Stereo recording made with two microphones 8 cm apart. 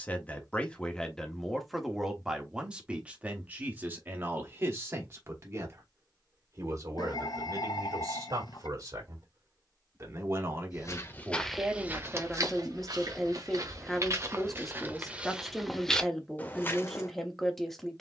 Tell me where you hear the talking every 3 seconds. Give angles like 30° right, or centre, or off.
centre, 30° right, 50° right, 30° right, centre, centre.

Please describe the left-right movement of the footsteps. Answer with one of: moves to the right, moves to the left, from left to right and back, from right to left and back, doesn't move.
from left to right and back.